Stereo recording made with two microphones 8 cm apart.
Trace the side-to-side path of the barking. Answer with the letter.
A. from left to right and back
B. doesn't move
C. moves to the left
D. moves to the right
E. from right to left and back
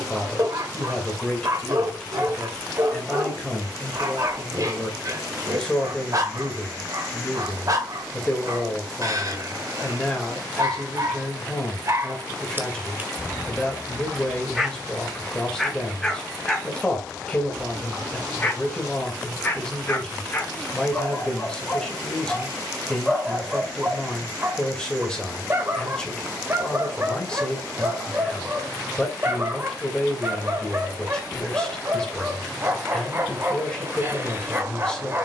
E.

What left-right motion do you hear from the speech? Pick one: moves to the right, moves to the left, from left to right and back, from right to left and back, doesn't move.
doesn't move.